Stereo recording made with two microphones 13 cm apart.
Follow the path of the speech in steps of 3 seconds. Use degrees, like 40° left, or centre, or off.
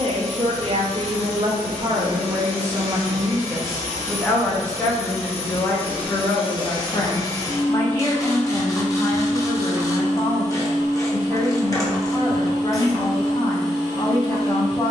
40° right, 10° left, 30° left, 30° left, 30° left.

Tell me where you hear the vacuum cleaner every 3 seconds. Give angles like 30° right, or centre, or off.
70° left, 50° left, 20° left, 20° right, 30° right.